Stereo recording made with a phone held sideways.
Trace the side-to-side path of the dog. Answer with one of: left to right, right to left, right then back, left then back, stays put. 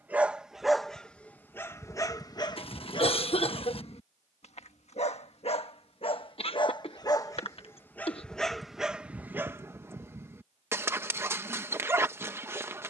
left then back.